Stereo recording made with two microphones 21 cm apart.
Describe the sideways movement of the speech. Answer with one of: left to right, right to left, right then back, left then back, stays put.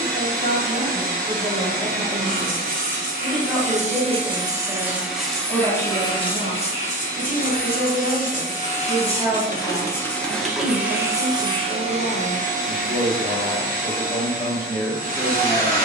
right then back.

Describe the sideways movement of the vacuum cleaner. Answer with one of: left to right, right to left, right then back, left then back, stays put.
left then back.